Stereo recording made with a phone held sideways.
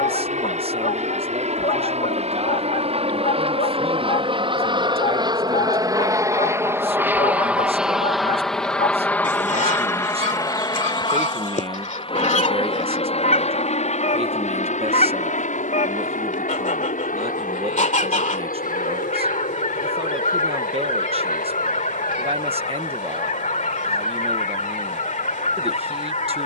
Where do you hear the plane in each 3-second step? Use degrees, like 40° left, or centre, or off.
50° right, 40° right, 10° right, 20° left, 40° left, 60° left, 60° left, 70° left, 70° left.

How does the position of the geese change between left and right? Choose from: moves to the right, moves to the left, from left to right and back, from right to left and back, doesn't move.
doesn't move.